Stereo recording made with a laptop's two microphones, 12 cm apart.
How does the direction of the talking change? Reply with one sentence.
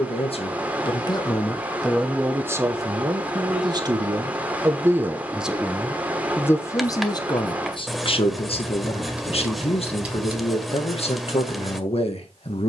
In this clip you hear the talking go right and come back.